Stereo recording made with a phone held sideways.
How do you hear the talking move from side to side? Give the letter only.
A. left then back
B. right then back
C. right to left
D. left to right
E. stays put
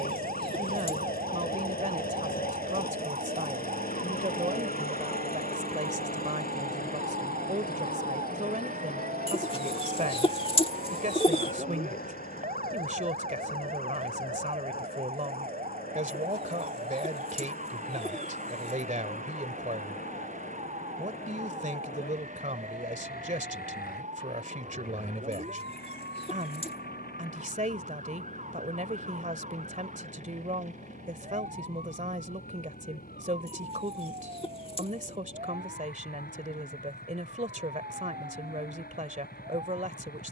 E.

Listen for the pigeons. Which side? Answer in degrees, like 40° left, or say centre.
30° left.